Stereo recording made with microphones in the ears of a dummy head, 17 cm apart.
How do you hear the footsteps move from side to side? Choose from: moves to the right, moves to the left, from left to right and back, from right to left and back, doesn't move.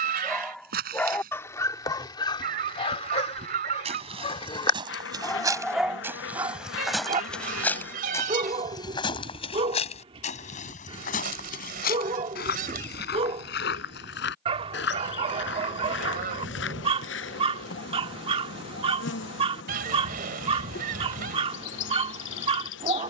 moves to the left.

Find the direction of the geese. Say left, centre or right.
right.